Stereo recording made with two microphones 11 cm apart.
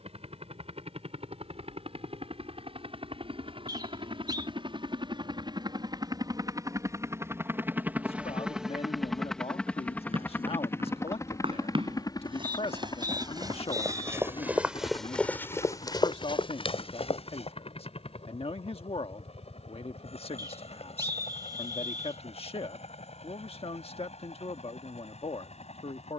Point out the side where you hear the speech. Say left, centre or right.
left.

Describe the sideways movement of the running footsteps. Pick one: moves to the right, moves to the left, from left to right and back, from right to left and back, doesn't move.
moves to the left.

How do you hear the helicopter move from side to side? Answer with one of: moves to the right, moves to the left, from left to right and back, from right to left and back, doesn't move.
moves to the left.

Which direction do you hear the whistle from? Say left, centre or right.
right.